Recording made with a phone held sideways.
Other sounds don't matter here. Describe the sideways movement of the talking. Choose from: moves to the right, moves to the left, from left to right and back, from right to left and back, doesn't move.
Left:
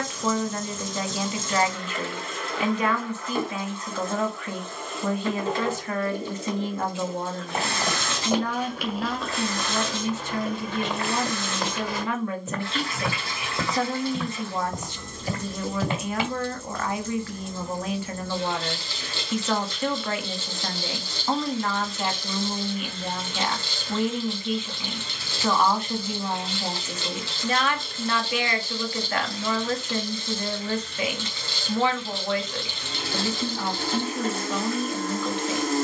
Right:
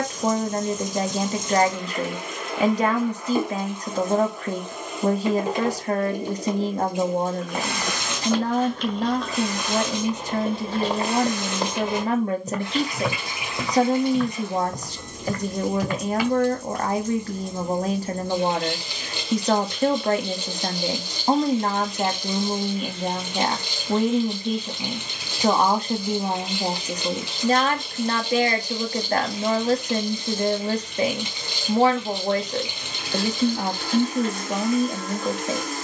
doesn't move.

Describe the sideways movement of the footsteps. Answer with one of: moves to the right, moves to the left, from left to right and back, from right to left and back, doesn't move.
from left to right and back.